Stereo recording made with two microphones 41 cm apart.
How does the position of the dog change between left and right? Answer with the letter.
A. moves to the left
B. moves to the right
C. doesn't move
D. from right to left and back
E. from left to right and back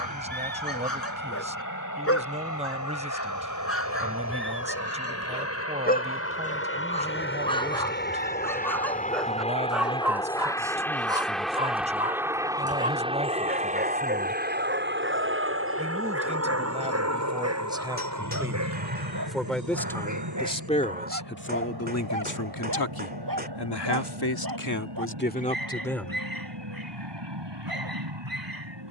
B.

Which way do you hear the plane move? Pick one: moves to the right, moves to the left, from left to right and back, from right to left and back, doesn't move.
moves to the right.